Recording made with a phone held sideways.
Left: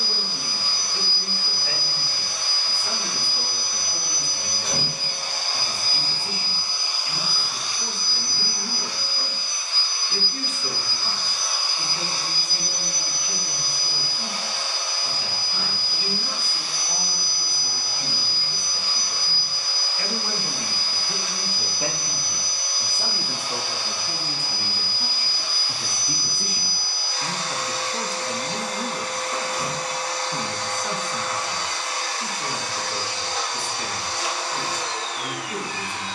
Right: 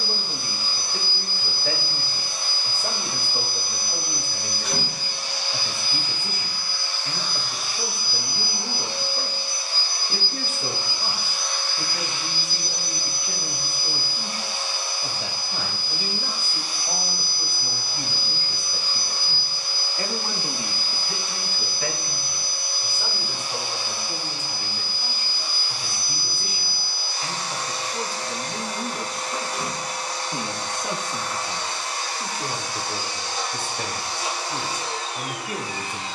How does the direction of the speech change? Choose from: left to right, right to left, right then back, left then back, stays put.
left then back.